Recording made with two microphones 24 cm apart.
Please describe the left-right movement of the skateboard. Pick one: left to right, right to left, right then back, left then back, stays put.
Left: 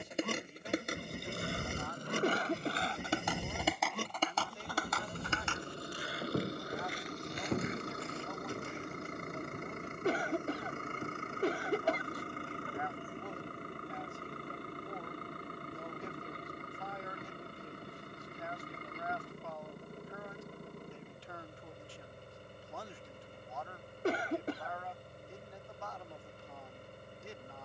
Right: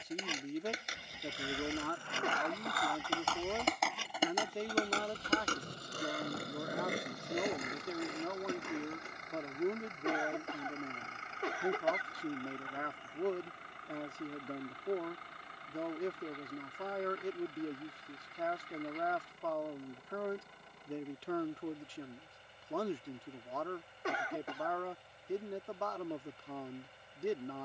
left to right.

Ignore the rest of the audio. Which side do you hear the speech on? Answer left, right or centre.
right.